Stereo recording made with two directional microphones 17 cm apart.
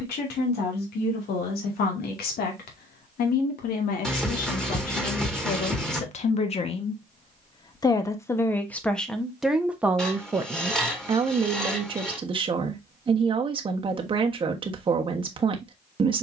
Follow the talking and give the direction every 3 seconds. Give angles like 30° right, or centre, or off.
70° left, 50° left, 30° left, 20° right, 30° right, 30° right.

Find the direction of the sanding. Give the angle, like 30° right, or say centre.
centre.